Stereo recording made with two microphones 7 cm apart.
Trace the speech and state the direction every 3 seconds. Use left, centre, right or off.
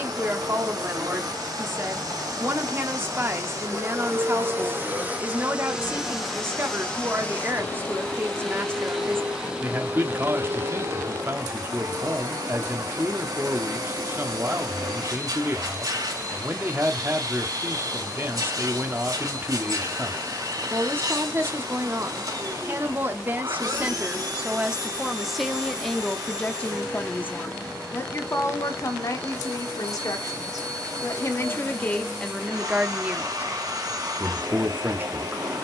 right, right, right, right, right, right, right, right, centre, left, left, right.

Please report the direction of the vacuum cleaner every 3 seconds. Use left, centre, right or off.
right, right, centre, right, right, right, right, right, right, right, right, right.